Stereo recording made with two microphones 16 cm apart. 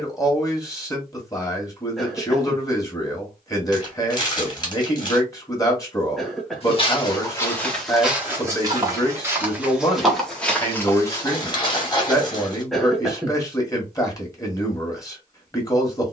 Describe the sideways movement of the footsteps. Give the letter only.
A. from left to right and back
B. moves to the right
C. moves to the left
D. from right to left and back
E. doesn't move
A.